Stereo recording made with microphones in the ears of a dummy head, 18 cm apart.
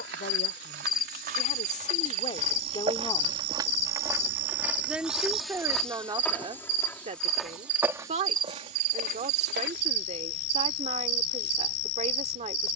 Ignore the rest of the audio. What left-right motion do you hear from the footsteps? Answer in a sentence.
In this clip you hear the footsteps go left and come back.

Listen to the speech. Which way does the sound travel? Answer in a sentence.
You can hear the speech go from the left side to the right.